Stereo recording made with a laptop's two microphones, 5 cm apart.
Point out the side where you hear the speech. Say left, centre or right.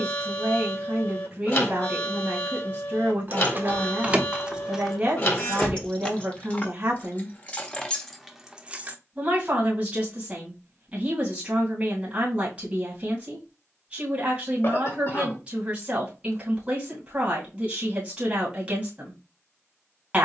right.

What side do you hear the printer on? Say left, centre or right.
left.